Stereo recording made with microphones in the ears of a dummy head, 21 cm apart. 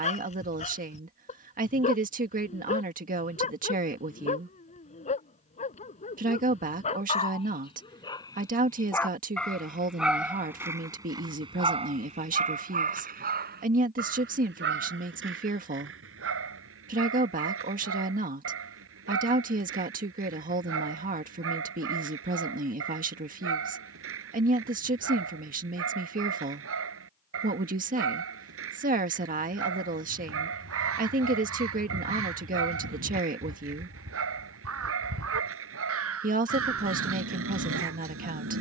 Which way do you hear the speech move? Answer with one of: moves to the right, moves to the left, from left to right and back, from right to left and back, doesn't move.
doesn't move.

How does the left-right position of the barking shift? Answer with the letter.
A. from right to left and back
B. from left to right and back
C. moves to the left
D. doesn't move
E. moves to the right
E.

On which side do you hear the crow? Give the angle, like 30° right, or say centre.
60° right.